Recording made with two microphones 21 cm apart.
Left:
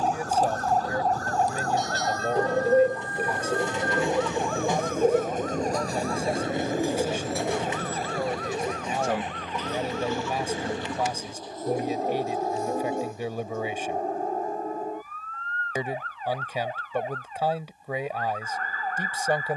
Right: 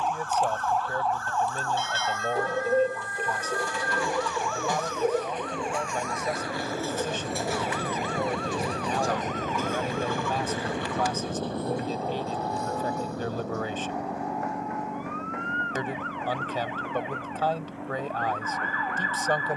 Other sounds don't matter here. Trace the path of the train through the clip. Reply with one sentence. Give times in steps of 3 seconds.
In this clip you hear the train on the left from 0 s, in the centre from 6 s and on the right from 9 s.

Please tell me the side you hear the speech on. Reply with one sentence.
In this clip you hear the speech in the centre.